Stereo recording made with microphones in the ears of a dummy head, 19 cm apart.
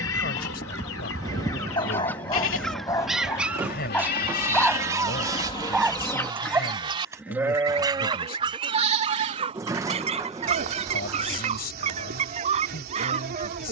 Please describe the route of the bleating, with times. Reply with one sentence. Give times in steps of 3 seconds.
In this clip you hear the bleating on the left from 0 s, in the centre from 6 s and on the right from 9 s.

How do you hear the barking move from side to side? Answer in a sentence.
In this clip you hear the barking move to the right.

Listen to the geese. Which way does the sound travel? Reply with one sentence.
You can hear the geese go from the left side to the right.